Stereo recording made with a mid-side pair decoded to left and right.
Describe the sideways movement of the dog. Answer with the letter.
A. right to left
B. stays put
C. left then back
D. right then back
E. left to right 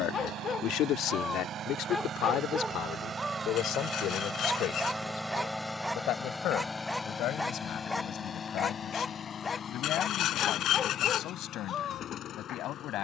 D.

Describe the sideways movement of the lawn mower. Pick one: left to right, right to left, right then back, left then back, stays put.
right to left.